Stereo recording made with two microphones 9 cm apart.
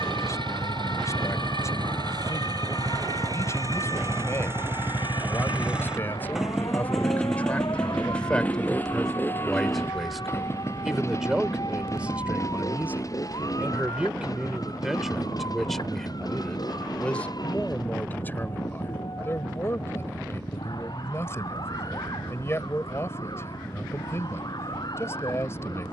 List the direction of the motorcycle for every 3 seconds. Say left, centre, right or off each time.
right, right, centre, left, left, left, left, left, left.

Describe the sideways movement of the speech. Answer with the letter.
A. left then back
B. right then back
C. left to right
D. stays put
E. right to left
B.